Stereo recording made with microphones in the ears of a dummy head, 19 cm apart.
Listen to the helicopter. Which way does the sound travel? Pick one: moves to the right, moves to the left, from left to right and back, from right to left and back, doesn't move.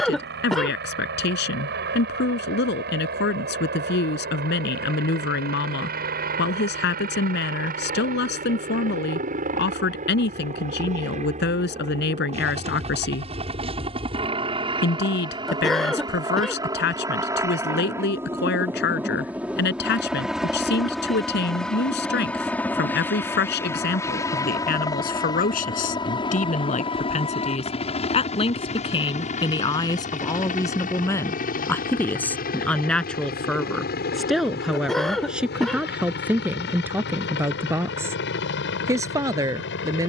moves to the left.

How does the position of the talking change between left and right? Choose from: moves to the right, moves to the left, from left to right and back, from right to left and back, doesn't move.
moves to the right.